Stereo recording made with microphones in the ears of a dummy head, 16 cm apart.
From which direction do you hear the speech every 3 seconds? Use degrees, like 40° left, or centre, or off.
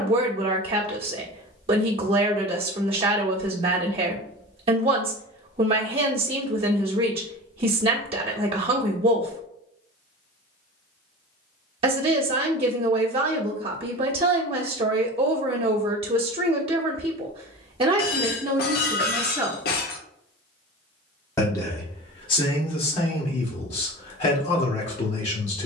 30° right, 30° right, 30° right, 30° right, 30° right, 30° right, 20° right, 30° left, 40° left.